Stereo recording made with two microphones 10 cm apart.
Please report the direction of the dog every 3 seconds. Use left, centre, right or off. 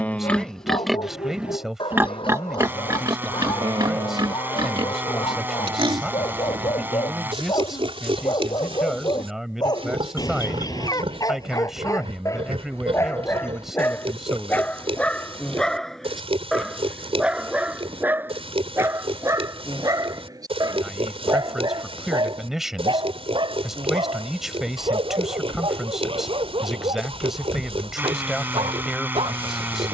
left, left, left, left, left, centre, right, right, right, right.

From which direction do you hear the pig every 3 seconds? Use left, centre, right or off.
centre, right, right, right, right, right, right, right, right, right.